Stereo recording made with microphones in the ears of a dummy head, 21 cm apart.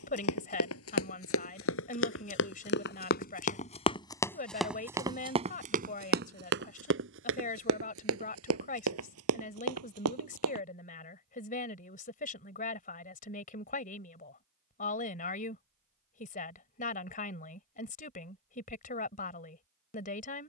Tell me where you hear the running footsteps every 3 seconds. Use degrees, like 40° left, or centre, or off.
60° left, centre, 60° right, 70° right, off, off, off.